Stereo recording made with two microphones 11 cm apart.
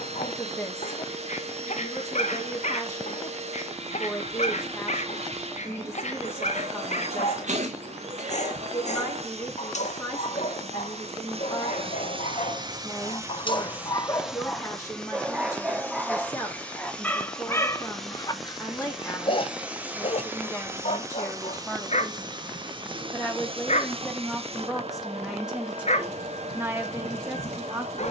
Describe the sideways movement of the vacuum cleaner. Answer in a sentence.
You can hear the vacuum cleaner go left and come back.